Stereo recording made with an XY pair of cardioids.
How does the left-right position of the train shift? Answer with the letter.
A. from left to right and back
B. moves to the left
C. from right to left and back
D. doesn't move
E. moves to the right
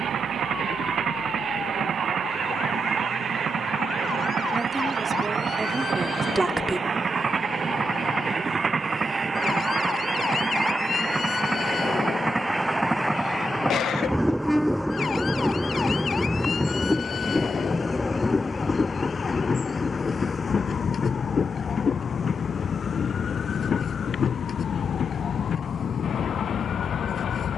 B.